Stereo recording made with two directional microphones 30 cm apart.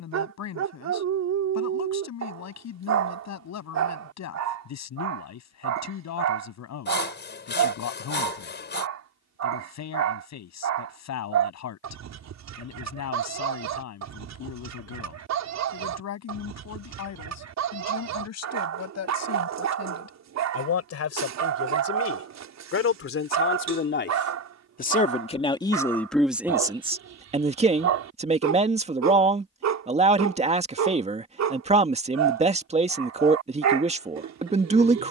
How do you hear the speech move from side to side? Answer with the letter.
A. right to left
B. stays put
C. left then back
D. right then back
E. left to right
E.